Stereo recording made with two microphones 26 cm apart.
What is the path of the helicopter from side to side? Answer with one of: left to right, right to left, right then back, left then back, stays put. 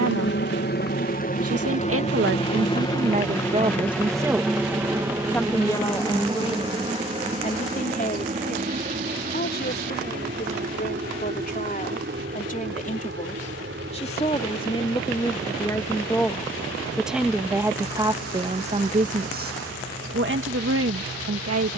left to right.